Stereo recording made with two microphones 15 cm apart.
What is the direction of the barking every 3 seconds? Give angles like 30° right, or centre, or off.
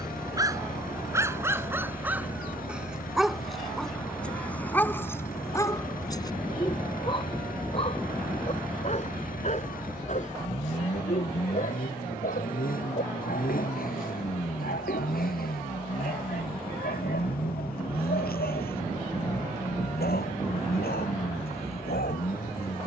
10° right, 10° left, 40° left, 60° left, 70° left, 80° left, 80° left, 80° left.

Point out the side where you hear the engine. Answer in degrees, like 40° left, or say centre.
70° left.